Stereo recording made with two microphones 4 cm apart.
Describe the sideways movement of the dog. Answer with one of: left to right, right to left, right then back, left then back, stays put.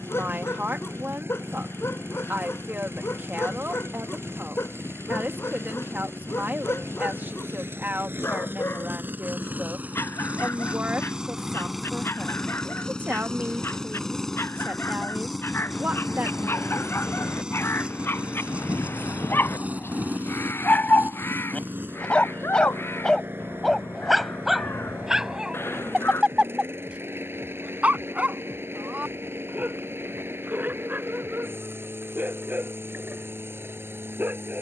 left to right.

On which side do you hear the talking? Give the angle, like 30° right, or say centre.
50° right.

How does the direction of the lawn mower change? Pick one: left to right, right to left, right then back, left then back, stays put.
left then back.